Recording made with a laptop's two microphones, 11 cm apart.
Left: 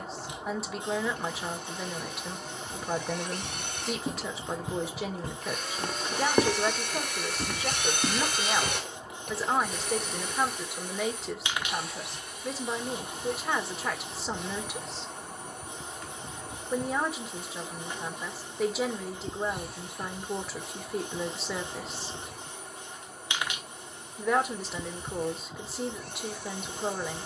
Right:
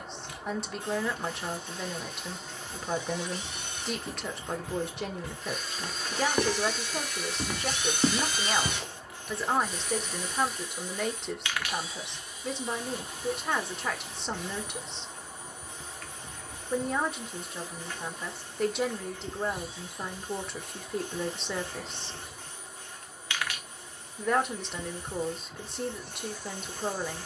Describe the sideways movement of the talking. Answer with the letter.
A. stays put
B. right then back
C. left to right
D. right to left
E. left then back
A.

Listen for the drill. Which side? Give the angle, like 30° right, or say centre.
70° left.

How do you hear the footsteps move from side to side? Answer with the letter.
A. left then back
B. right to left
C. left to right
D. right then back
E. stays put
C.